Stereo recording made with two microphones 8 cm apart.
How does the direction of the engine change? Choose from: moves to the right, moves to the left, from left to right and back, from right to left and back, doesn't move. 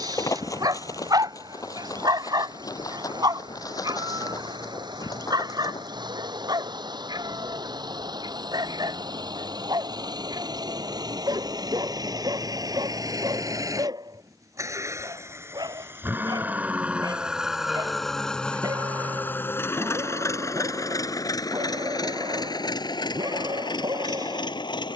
moves to the left.